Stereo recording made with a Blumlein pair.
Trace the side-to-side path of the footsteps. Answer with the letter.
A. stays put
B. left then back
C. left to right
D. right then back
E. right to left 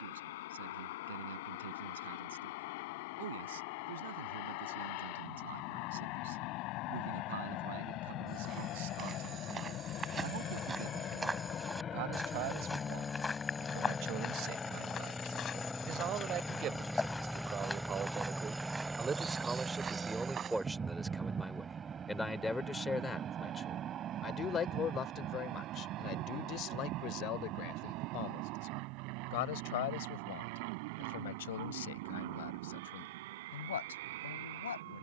B.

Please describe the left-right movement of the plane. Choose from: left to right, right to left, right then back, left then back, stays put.
left to right.